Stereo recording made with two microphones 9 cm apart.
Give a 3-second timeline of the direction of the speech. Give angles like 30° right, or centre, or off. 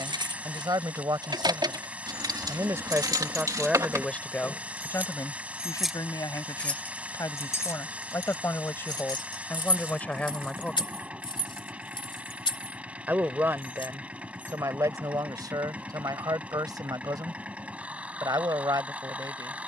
40° right, 20° left, 40° left, 20° left, 30° right, 50° right, 50° right.